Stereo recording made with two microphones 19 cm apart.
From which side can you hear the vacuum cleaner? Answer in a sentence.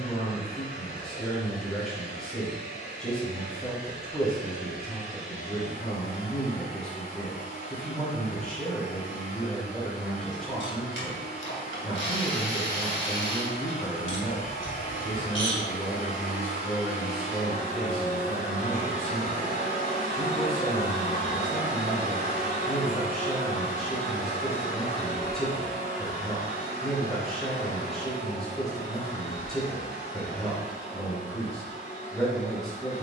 In this clip you hear the vacuum cleaner on the left.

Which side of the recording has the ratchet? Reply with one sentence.
In this clip you hear the ratchet on the left.